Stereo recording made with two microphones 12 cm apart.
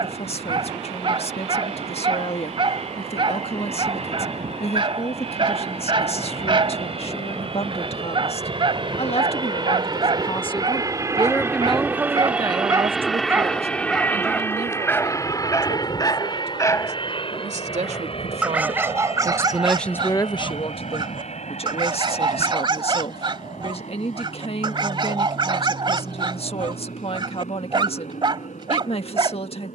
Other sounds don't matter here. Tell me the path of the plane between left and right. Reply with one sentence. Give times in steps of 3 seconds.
You can hear the plane on the right from 0 s, in the centre from 12 s and on the left from 15 s.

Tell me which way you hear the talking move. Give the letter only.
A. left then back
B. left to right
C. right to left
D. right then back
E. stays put
D.